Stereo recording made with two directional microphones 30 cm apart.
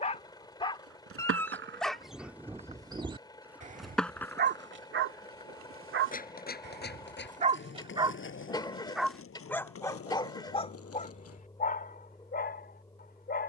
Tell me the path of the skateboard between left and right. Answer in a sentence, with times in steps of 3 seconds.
You can hear the skateboard on the right from 0 s, in the centre from 3 s, on the left from 6 s and not at all from 12 s.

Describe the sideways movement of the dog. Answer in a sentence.
You can hear the dog move from left to right and back again.